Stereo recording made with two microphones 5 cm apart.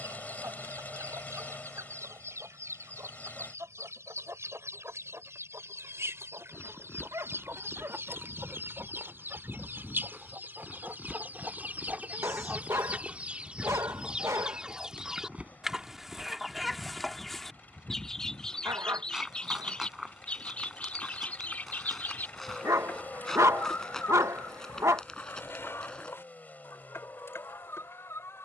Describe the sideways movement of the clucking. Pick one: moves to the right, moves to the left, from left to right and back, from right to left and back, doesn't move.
moves to the left.